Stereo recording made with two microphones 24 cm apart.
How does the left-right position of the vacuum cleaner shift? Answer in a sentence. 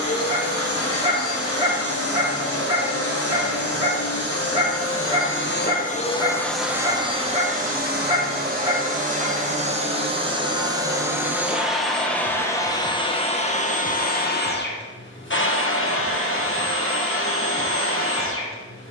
In this clip you hear the vacuum cleaner move from left to right and back again.